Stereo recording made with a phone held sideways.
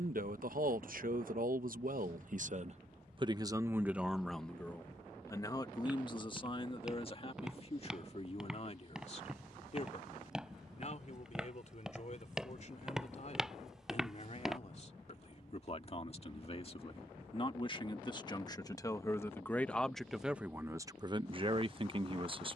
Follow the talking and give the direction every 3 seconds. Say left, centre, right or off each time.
right, centre, left, left, left, left, centre, right.